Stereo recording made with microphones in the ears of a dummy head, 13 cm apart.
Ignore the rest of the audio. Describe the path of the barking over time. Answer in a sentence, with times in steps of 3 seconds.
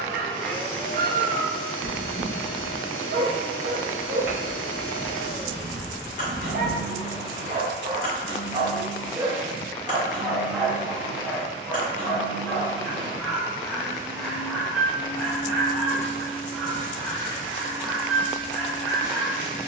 You can hear the barking on the right from 0 s and in the centre from 9 s.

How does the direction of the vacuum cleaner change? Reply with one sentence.
In this clip you hear the vacuum cleaner stay in one place.